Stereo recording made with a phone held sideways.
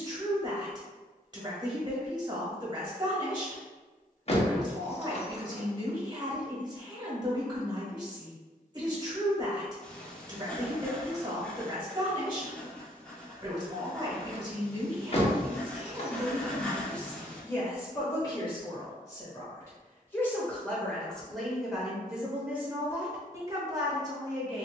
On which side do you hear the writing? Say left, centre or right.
centre.